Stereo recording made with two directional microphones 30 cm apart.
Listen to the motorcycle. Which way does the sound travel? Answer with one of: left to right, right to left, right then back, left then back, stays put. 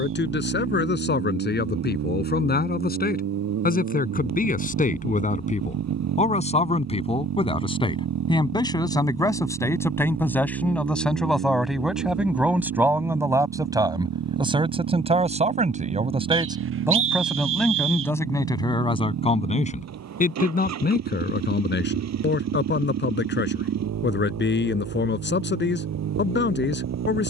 stays put.